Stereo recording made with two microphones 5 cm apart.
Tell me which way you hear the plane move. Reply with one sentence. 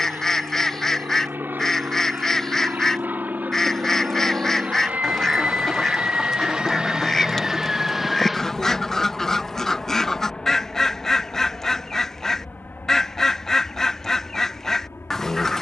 You can hear the plane go from the right side to the left.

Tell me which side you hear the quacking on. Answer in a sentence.
In this clip you hear the quacking in the centre.